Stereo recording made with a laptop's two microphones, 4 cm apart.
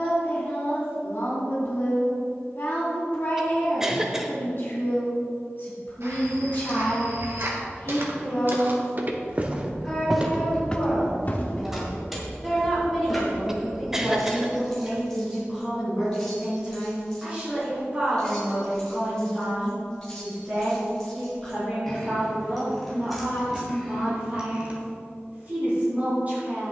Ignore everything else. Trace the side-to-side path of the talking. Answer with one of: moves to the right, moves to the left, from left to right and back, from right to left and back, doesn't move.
moves to the right.